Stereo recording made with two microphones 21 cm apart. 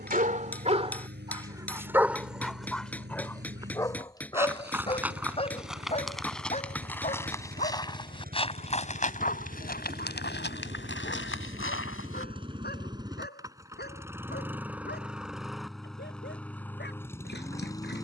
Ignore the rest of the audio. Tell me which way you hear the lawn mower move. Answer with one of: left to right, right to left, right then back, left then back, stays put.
right to left.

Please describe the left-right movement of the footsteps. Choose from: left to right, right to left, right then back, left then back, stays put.
right to left.